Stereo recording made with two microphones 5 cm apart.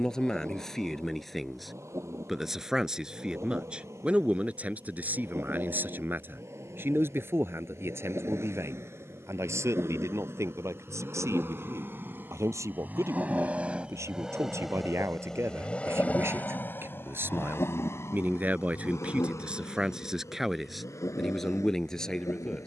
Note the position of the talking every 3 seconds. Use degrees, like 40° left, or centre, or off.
centre, 30° right, 50° right, 70° right, 70° right, 50° right, 20° right, 10° left.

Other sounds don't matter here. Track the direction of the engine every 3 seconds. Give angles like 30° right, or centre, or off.
70° right, 70° right, 60° right, 50° right, 20° right, 40° left, 70° left, 80° left.